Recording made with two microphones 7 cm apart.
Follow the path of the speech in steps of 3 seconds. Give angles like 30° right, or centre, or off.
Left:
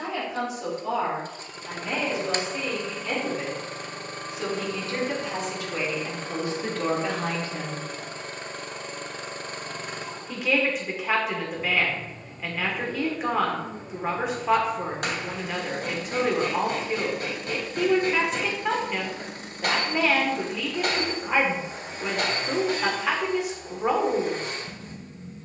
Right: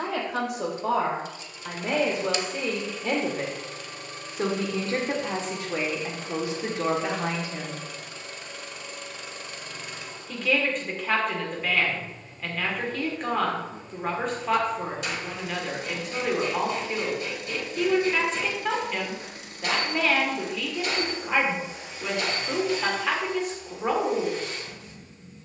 60° right, 40° right, 10° right, 10° left, 10° left, 10° left, 10° left, 10° left, 10° left.